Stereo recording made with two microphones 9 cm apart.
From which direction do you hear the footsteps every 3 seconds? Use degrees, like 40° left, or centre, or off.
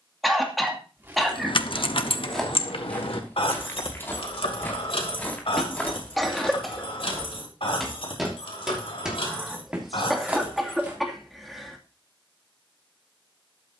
centre, 20° left, 10° left, 10° right, off.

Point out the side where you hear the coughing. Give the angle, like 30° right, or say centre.
centre.